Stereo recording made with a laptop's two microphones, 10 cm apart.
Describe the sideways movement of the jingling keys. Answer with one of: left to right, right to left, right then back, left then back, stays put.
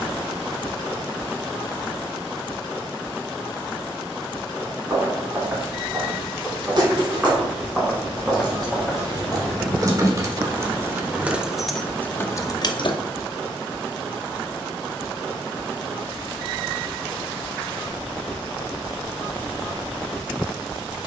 right to left.